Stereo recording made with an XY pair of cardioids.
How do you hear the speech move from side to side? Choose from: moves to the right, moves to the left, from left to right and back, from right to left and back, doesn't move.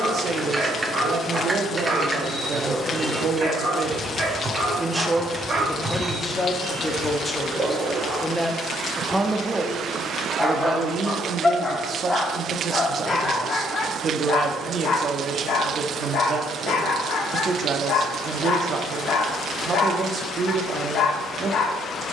from right to left and back.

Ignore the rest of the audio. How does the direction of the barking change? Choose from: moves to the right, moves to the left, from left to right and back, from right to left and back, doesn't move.
moves to the left.